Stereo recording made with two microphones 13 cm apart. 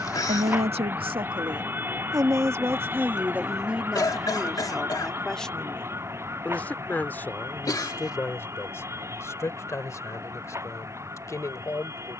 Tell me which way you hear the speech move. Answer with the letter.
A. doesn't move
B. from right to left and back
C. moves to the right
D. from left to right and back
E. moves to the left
E.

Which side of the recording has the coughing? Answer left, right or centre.
left.